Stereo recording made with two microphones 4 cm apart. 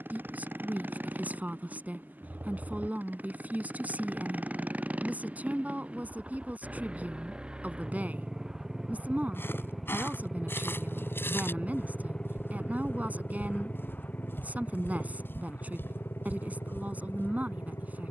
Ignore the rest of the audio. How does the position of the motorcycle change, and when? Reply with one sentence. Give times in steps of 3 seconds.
In this clip you hear the motorcycle on the right from 0 s, in the centre from 9 s and on the left from 12 s.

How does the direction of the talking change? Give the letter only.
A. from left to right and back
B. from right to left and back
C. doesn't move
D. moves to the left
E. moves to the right
C.